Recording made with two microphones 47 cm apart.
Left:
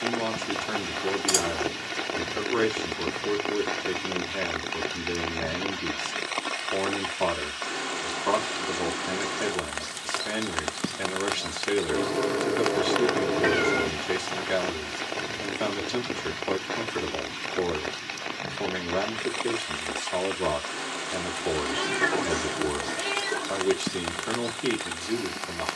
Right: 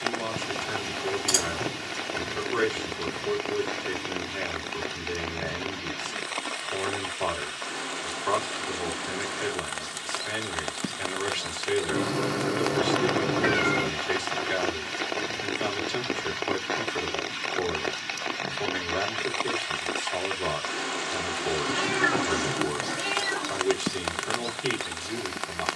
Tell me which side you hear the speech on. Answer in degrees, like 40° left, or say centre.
60° left.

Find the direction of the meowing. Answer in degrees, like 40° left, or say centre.
30° right.